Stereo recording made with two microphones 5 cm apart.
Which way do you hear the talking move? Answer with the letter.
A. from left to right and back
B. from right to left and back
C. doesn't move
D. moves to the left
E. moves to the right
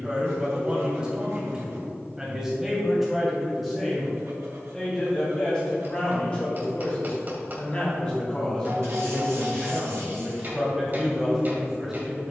B.